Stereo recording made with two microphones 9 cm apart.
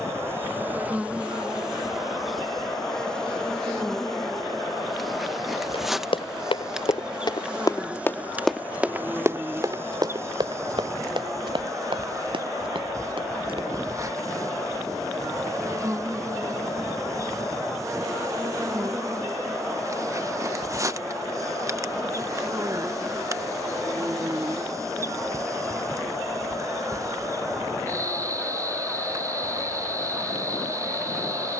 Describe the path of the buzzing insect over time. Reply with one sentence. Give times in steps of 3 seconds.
You can hear the buzzing insect in the centre from 0 s and on the right from 9 s.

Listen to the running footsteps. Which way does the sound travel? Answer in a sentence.
You can hear the running footsteps go from the left side to the right.